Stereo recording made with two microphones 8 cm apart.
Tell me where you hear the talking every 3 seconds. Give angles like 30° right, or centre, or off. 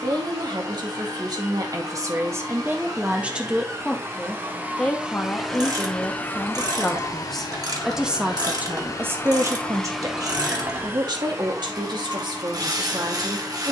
50° right, 10° left, centre, 50° right, 70° right.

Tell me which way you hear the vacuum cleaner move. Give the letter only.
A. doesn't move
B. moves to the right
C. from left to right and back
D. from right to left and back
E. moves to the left
D.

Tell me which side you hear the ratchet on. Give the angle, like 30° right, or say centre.
50° right.